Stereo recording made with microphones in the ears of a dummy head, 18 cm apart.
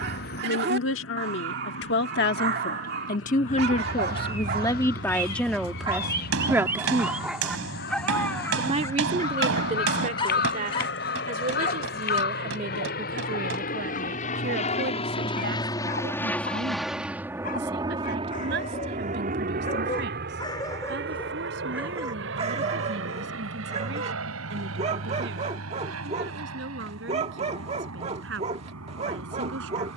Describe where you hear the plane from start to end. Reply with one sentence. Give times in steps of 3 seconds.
In this clip you hear the plane on the left from 0 s, in the centre from 15 s and on the right from 18 s.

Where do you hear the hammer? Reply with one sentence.
You can hear the hammer on the right.